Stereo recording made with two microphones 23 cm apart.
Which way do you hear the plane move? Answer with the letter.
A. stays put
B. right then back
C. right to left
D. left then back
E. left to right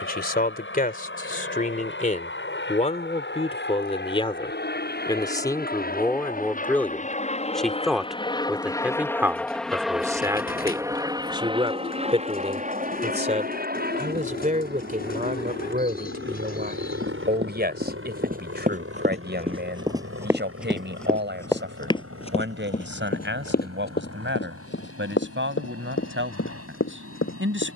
E.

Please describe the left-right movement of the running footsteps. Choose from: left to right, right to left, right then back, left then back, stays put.
right to left.